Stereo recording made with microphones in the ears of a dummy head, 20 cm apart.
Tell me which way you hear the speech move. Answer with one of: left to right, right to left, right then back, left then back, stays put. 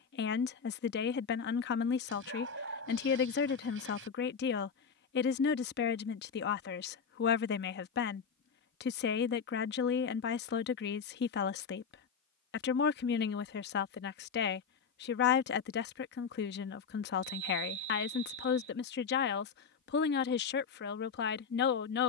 stays put.